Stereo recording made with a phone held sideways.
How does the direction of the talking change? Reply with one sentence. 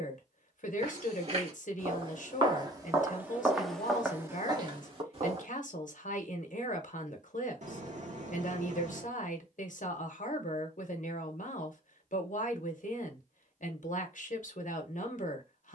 You can hear the talking stay in one place.